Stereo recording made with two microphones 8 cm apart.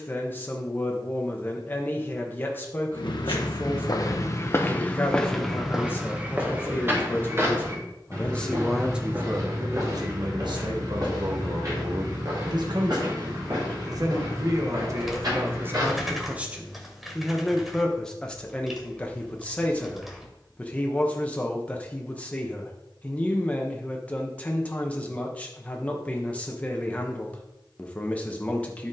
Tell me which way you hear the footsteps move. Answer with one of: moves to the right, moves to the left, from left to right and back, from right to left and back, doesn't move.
moves to the right.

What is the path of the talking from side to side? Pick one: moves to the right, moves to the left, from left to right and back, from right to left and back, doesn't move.
from left to right and back.